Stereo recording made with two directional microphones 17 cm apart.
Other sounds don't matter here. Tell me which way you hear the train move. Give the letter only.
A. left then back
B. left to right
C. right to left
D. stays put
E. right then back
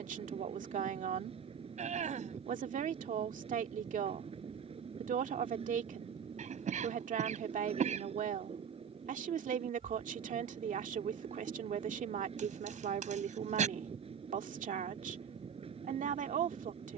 D.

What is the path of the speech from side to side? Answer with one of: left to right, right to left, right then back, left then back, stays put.
stays put.